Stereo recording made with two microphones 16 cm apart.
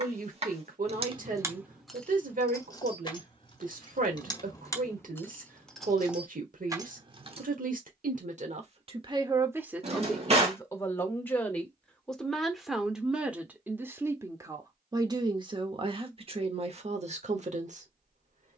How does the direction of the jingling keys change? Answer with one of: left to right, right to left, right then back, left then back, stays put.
left then back.